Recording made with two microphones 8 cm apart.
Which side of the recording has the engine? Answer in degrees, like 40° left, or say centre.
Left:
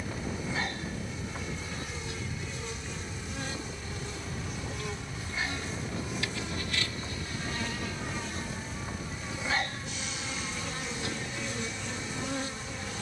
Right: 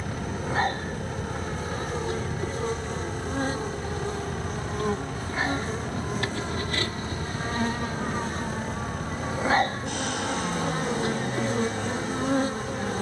60° right.